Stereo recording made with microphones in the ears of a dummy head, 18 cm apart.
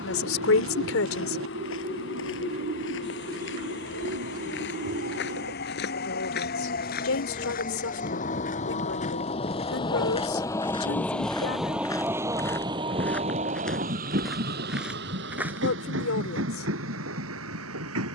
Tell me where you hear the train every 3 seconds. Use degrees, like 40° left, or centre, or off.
60° left, 50° left, 40° left, 10° left, 30° right, 60° right.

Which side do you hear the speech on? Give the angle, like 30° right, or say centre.
80° left.